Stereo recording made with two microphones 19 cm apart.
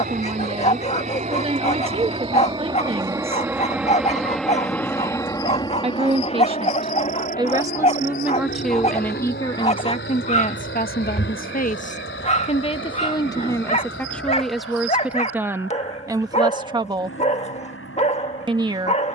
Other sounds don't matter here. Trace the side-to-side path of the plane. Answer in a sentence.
You can hear the plane go from the right side to the left.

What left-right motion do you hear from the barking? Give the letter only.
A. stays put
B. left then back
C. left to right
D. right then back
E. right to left
A.